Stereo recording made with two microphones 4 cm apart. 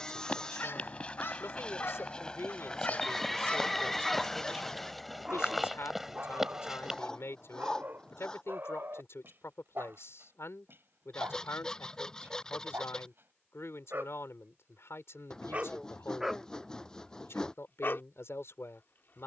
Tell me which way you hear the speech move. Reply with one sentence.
In this clip you hear the speech stay in one place.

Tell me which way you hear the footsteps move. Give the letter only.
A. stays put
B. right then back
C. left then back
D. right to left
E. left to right
E.